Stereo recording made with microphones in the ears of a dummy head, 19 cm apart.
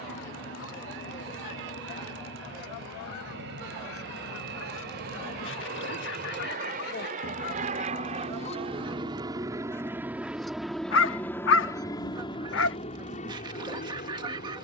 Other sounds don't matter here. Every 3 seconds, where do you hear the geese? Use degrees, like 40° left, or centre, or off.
80° left, 70° left, 40° left, centre, 20° right.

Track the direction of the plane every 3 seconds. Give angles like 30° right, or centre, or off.
70° right, 60° right, 40° right, centre, 30° left.